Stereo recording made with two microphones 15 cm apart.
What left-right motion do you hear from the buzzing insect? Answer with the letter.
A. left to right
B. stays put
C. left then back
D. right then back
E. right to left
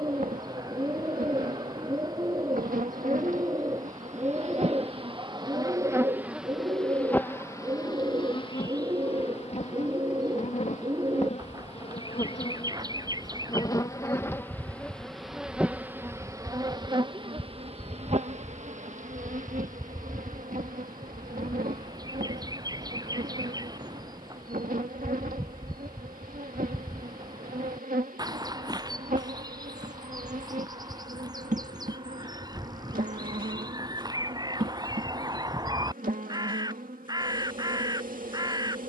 C.